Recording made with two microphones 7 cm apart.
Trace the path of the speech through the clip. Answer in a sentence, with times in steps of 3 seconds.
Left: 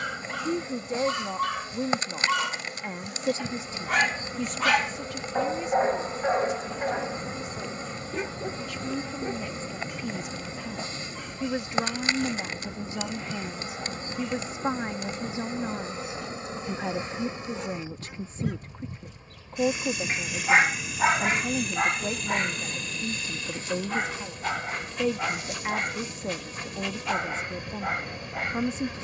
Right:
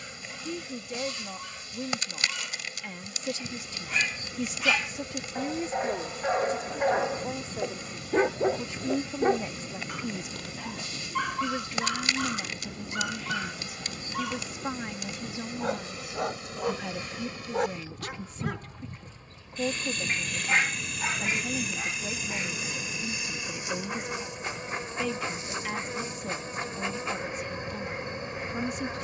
You can hear the speech on the left from 0 s, in the centre from 3 s, on the right from 6 s, in the centre from 9 s and on the left from 12 s.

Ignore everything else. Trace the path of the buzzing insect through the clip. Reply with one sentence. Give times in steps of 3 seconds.
In this clip you hear the buzzing insect on the left from 0 s, in the centre from 18 s and on the right from 24 s.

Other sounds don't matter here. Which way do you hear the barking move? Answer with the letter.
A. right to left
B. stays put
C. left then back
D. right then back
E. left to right
D.